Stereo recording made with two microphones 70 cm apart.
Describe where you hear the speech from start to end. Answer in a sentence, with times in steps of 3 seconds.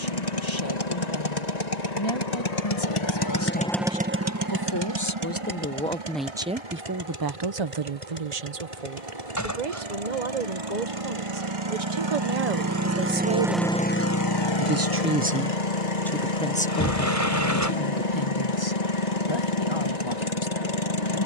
You can hear the speech on the left from 0 s, on the right from 6 s, in the centre from 15 s and on the left from 18 s.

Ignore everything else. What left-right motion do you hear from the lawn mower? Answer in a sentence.
In this clip you hear the lawn mower move from left to right and back again.